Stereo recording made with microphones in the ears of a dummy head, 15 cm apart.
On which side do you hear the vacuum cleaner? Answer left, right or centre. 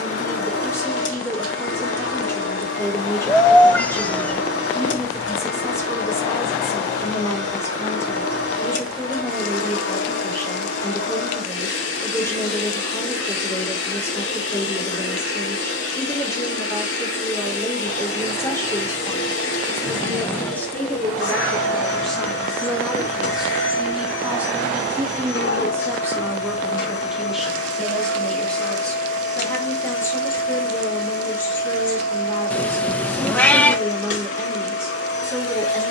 left.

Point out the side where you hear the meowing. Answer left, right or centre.
centre.